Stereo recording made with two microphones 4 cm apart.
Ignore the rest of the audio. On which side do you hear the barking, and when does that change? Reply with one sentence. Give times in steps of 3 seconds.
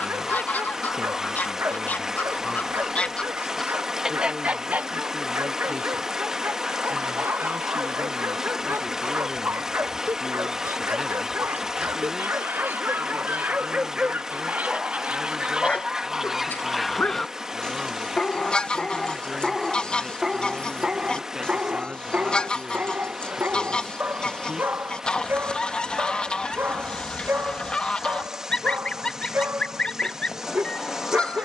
In this clip you hear the barking on the right from 0 s, on the left from 15 s, in the centre from 18 s and on the right from 21 s.